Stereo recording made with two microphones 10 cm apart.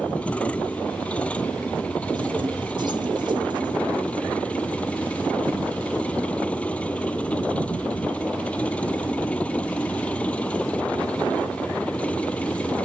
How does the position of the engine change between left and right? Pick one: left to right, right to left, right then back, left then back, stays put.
stays put.